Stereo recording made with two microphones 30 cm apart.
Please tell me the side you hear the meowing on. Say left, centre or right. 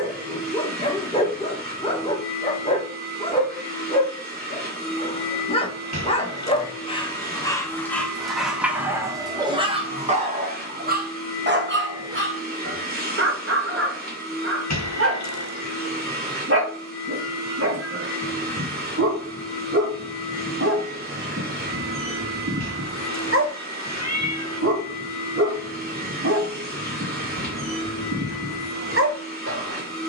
left.